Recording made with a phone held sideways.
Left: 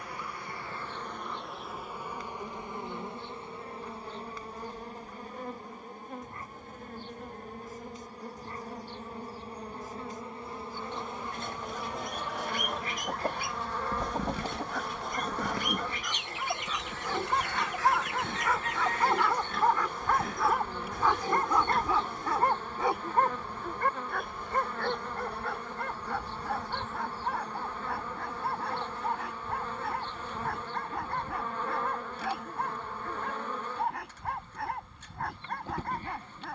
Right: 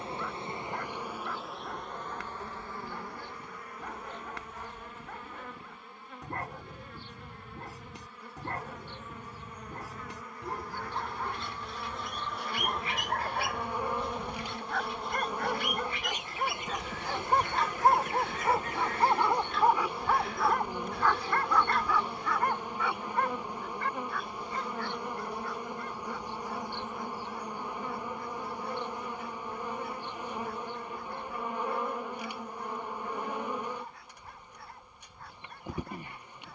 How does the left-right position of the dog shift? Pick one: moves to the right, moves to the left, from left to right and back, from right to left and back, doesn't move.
moves to the left.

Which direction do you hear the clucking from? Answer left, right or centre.
left.